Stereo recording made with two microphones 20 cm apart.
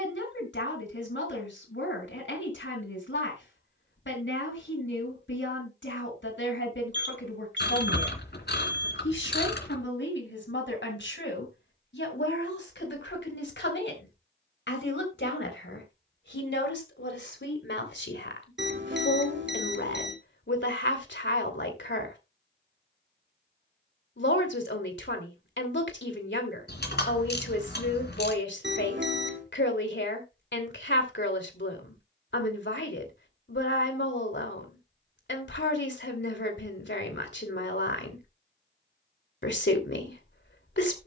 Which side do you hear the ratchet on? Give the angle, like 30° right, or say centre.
50° left.